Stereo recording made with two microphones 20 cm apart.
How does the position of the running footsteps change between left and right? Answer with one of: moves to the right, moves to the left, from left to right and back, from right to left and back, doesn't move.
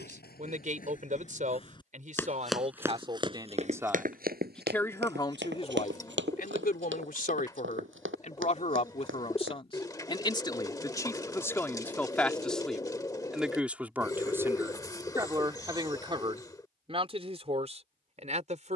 moves to the right.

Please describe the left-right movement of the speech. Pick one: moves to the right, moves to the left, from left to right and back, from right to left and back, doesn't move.
from right to left and back.